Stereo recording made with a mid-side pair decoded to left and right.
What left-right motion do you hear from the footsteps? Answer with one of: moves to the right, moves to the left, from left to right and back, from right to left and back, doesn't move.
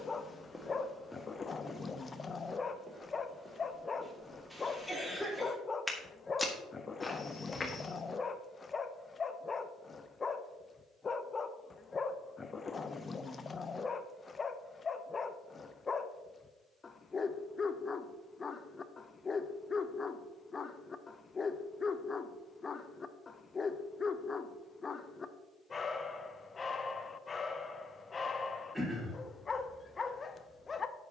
from left to right and back.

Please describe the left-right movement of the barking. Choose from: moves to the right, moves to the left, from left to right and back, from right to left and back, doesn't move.
doesn't move.